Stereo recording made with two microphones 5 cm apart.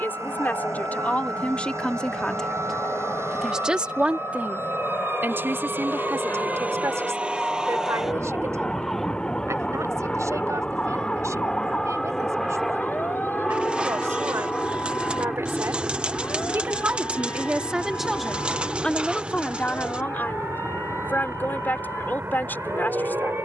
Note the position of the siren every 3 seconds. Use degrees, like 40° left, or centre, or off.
70° right, 50° right, 20° right, 20° left, 40° left, 50° left, 60° left, 60° left.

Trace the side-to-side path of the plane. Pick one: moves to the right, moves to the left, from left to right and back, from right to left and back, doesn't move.
moves to the right.